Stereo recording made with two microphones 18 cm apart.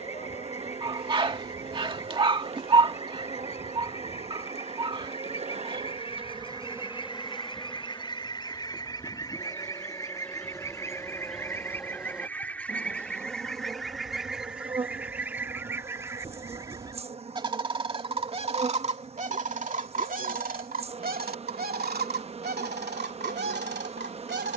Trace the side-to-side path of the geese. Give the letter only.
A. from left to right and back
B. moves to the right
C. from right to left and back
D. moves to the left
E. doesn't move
B.